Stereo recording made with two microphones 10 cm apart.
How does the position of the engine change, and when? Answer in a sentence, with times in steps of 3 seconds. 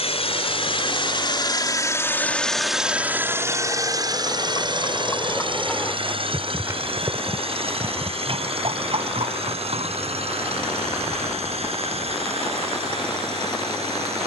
You can hear the engine on the left from 0 s and on the right from 3 s.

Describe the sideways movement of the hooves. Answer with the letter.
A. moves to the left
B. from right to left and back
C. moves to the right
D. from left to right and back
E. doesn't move
C.